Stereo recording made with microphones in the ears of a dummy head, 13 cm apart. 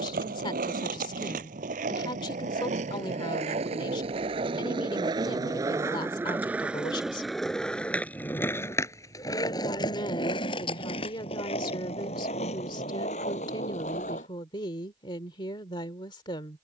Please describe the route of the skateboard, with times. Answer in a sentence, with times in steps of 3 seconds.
You can hear the skateboard on the right from 0 s, in the centre from 6 s, on the left from 9 s and not at all from 15 s.